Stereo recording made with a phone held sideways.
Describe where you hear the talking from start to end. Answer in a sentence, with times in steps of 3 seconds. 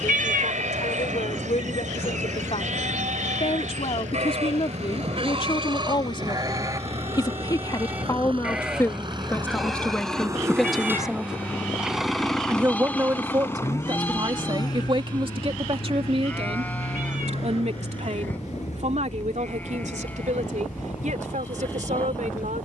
In this clip you hear the talking on the left from 0 s, in the centre from 9 s and on the right from 12 s.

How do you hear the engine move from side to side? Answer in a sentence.
You can hear the engine travel towards the left.